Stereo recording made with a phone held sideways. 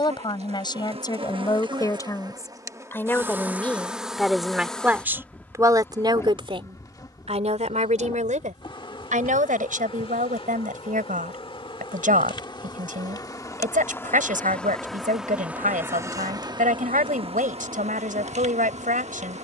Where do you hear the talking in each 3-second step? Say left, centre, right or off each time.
left, centre, right, right, right, right, right.